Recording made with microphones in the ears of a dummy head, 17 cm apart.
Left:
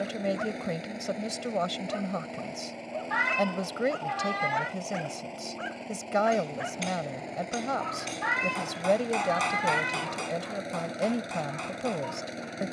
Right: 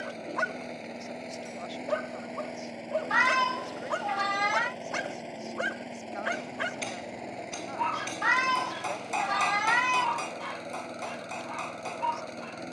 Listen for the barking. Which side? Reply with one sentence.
In this clip you hear the barking on the right.